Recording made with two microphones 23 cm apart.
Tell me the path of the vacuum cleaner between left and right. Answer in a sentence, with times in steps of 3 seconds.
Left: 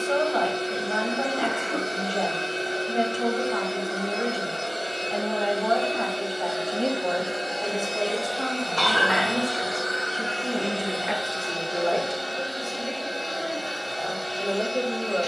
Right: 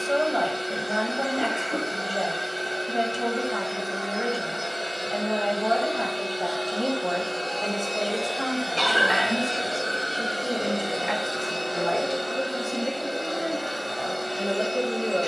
In this clip you hear the vacuum cleaner on the left from 0 s, in the centre from 6 s and on the right from 9 s.